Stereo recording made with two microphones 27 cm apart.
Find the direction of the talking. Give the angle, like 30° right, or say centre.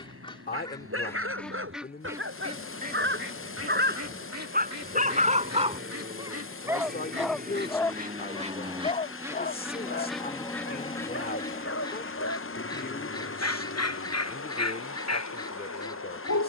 30° left.